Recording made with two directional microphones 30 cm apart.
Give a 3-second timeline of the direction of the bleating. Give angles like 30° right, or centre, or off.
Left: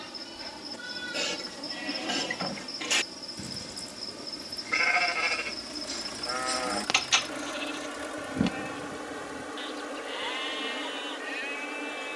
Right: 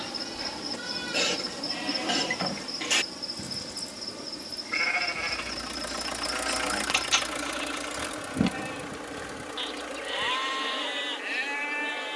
20° right, 10° left, centre, 30° right.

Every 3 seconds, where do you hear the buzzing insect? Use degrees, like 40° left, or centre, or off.
30° right, 10° right, centre, 10° left.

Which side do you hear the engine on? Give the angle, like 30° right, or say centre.
60° right.